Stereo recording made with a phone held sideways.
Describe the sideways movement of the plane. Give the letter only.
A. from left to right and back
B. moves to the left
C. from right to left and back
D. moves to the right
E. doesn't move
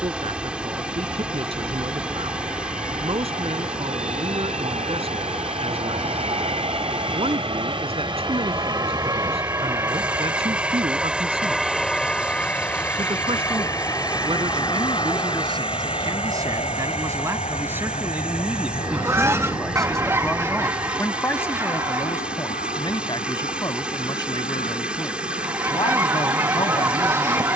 B.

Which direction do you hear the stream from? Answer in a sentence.
In this clip you hear the stream in the centre.